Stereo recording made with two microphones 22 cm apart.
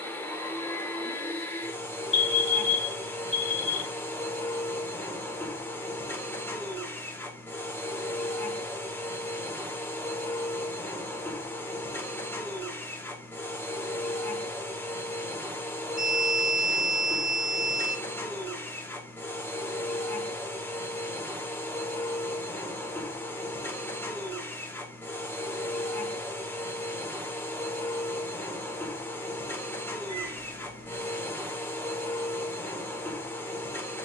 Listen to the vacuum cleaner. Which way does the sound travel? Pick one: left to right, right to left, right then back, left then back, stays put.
stays put.